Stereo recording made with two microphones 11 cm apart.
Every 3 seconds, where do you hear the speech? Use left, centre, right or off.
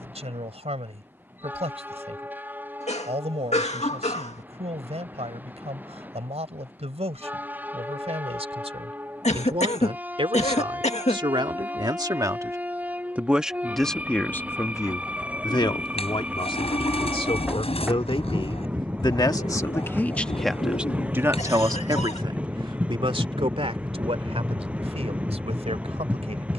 right, right, right, right, centre, left, left, right, right.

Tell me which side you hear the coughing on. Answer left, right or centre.
left.